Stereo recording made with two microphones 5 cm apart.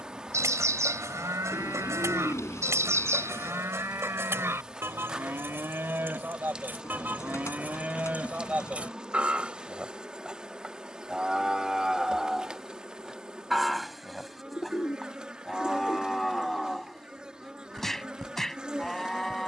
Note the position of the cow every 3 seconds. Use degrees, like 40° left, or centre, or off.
70° right, 60° right, 30° right, 10° right, centre, 10° left, 10° left.